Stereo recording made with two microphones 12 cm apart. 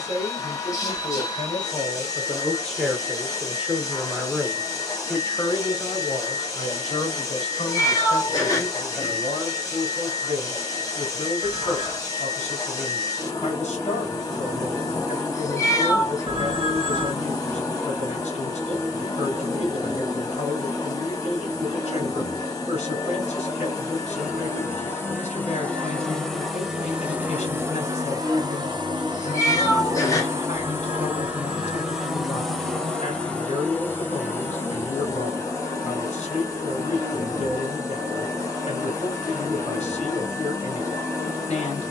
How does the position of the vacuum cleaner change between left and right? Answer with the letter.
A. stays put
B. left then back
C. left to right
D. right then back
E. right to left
D.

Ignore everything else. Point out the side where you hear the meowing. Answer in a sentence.
You can hear the meowing on the left.